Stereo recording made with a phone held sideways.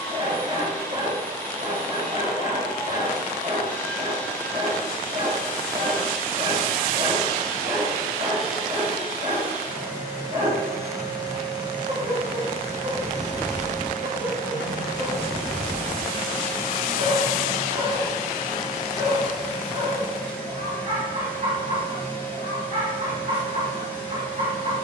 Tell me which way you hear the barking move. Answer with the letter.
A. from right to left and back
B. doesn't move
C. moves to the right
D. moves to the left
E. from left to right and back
B.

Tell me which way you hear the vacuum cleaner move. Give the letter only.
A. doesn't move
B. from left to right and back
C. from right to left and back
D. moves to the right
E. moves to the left
B.